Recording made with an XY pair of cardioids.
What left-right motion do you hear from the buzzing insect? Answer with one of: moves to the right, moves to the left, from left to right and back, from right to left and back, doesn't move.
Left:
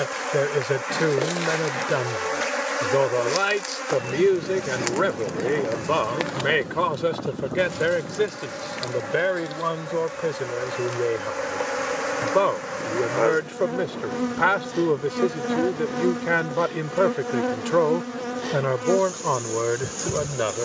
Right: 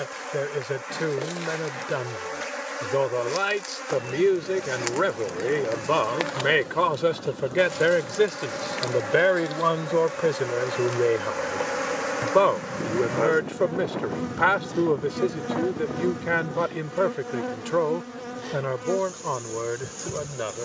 from left to right and back.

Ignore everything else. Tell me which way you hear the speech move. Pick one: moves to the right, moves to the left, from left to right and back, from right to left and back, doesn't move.
from left to right and back.